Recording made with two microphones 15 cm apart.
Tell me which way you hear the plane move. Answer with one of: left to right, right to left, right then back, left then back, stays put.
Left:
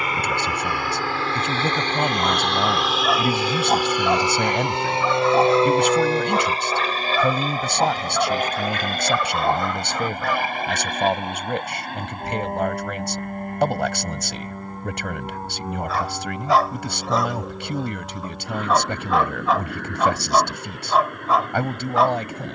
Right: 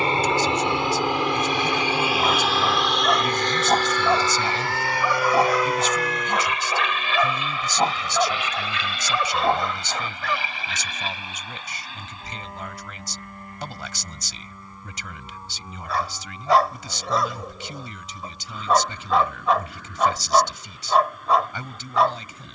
right to left.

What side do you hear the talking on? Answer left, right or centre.
left.